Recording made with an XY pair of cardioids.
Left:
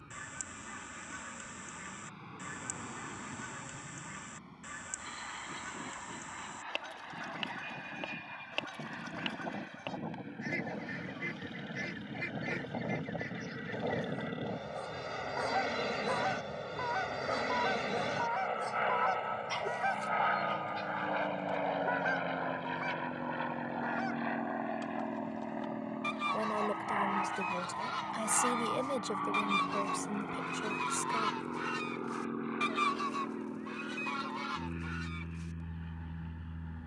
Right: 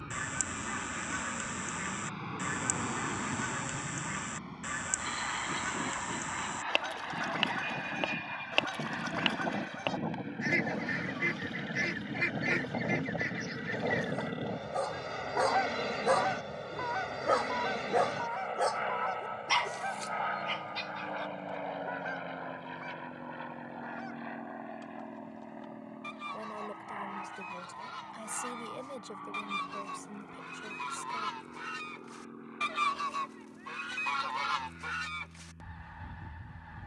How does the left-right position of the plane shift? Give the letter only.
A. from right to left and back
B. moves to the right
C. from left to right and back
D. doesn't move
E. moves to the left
E.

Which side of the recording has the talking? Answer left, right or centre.
left.